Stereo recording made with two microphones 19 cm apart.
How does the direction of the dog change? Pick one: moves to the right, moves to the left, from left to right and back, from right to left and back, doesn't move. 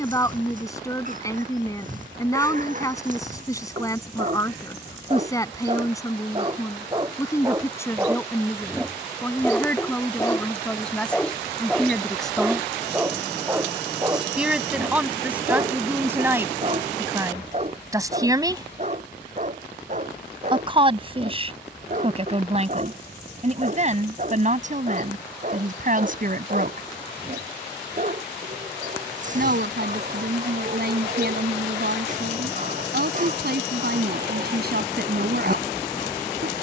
from right to left and back.